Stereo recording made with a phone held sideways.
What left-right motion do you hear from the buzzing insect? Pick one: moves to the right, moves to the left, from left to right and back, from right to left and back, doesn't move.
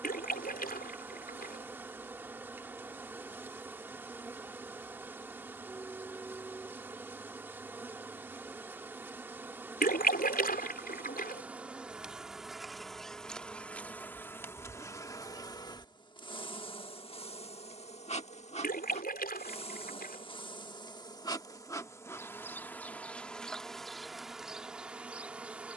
from right to left and back.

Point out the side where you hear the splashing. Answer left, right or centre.
left.